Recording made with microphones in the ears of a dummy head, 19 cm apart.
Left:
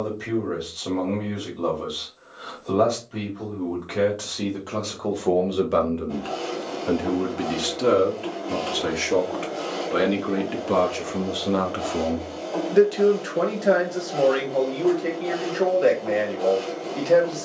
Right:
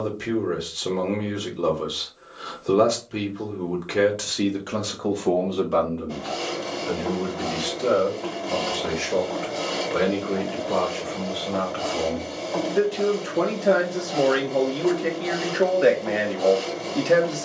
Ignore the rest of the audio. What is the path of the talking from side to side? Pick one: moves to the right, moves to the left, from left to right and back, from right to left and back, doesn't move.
from right to left and back.